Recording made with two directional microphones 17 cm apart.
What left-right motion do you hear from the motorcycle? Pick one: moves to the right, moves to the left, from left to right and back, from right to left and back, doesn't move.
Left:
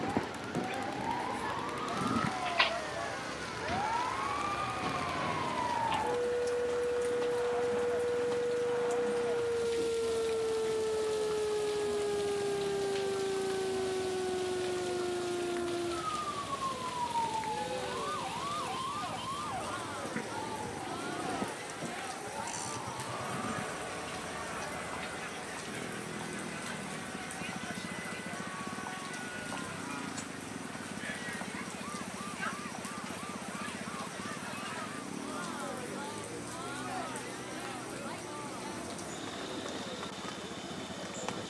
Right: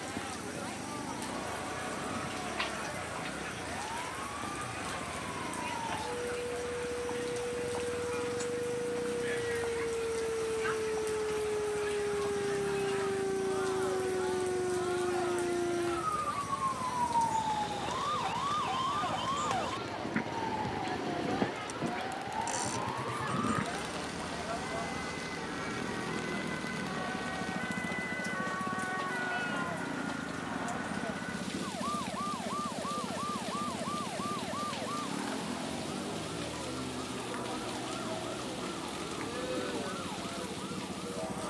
doesn't move.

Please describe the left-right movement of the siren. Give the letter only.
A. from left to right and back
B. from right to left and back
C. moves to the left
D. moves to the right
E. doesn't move
D.